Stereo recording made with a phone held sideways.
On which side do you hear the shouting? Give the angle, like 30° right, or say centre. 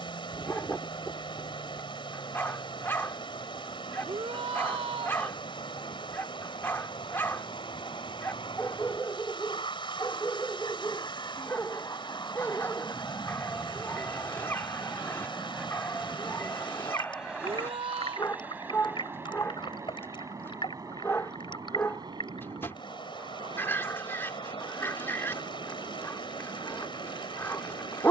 40° right.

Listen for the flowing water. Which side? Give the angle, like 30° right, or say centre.
40° left.